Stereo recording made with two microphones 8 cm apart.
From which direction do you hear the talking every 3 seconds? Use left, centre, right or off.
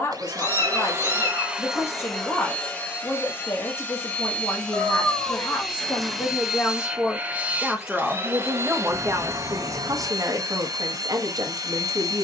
left, left, centre, right.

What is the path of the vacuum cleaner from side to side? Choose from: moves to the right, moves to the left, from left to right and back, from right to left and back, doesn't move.
from right to left and back.